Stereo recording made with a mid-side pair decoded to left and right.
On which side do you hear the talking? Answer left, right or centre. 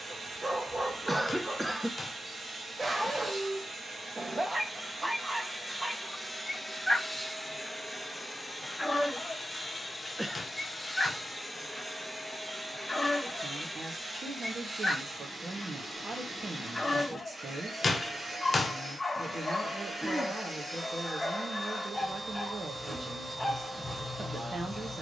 right.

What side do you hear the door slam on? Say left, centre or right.
left.